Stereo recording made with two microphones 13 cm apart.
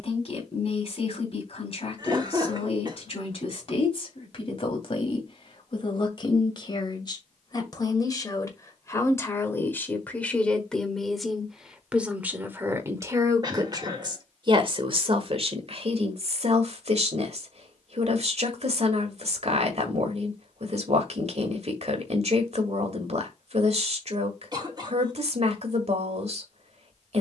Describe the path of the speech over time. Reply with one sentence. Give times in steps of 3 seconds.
You can hear the speech on the left from 0 s, in the centre from 9 s and on the right from 12 s.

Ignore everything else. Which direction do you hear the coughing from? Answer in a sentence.
In this clip you hear the coughing on the right.